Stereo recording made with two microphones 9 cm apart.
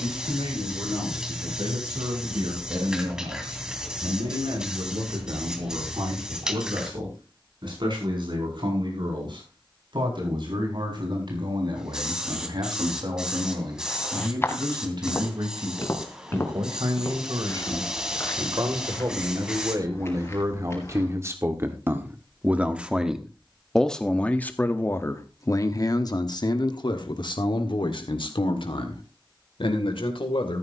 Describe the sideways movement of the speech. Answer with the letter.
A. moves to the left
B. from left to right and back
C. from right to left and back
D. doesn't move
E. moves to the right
A.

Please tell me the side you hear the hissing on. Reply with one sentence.
In this clip you hear the hissing in the centre.